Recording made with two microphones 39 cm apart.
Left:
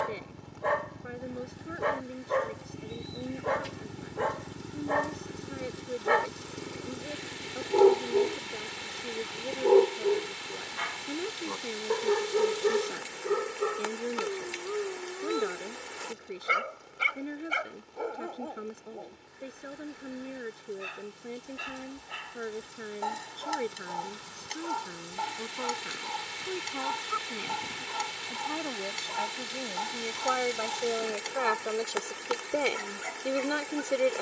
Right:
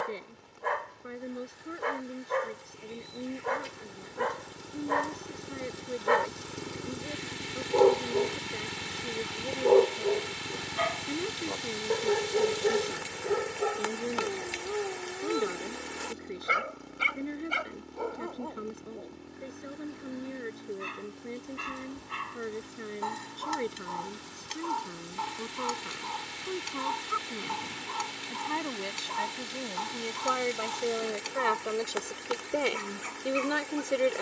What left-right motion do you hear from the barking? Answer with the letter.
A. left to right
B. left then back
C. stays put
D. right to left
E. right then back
A.